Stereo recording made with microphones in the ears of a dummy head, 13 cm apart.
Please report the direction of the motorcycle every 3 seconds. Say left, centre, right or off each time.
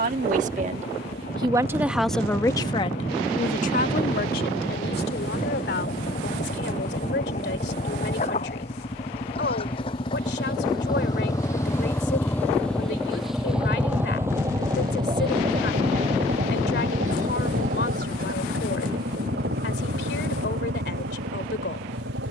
left, left, left, left, centre, right, right, right.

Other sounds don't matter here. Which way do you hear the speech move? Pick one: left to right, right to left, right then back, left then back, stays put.
right to left.